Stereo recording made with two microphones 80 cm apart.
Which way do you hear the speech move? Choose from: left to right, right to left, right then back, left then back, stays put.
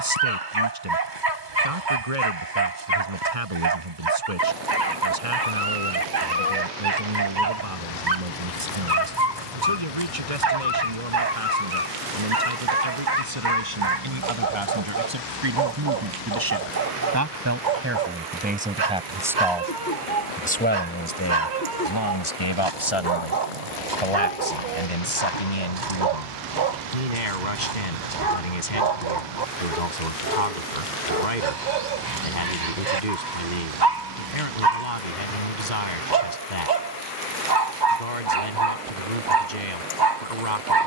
right to left.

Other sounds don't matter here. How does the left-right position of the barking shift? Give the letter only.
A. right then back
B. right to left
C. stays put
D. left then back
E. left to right
C.